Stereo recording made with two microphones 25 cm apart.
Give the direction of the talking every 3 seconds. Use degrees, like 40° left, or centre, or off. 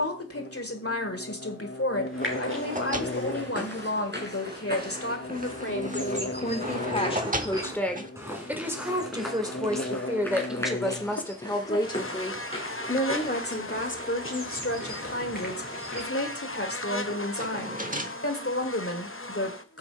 60° left, 60° left, 20° left, centre, 40° left, 60° left, 60° left.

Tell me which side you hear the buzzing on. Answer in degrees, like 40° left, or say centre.
60° left.